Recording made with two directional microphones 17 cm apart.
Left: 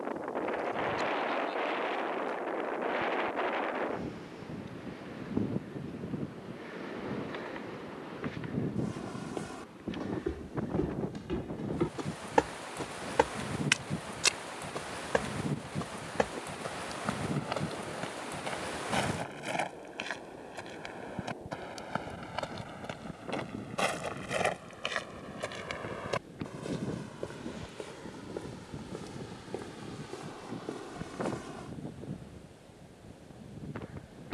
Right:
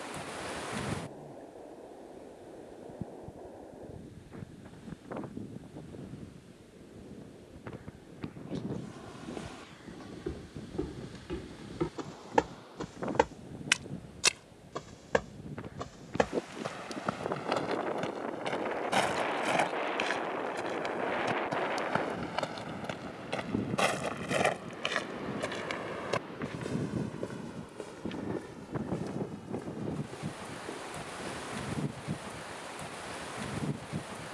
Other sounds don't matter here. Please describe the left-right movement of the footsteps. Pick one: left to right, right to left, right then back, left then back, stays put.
right then back.